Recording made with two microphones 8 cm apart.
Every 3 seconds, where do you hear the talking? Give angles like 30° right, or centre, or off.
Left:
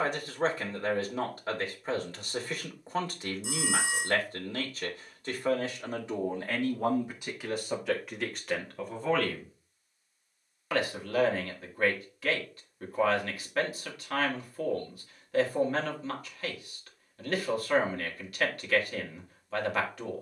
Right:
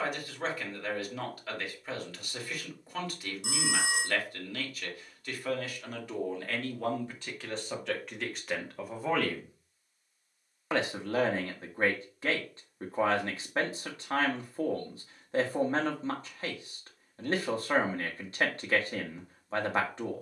30° left, 30° left, 10° left, 20° right, 30° right, 30° right, 30° right.